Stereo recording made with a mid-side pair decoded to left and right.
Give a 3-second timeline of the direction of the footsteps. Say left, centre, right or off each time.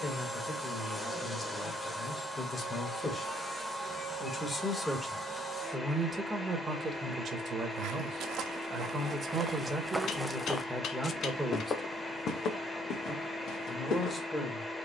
off, off, right, centre, left.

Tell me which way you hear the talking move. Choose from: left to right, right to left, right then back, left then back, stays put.
right then back.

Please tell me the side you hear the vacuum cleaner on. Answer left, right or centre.
centre.